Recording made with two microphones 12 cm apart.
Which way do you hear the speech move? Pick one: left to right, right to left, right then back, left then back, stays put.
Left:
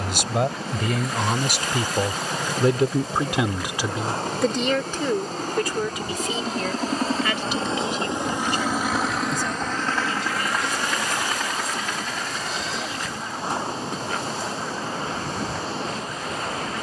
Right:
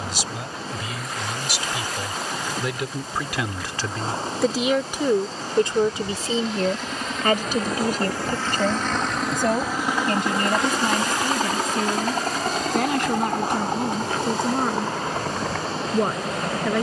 left to right.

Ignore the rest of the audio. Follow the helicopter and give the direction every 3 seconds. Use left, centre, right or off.
left, left, left, right, right, right.